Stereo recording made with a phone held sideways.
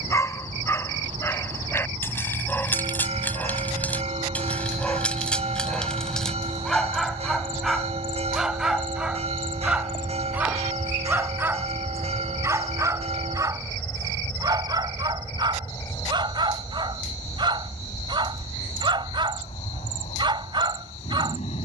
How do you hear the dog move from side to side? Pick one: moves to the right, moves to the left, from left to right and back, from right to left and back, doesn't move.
moves to the right.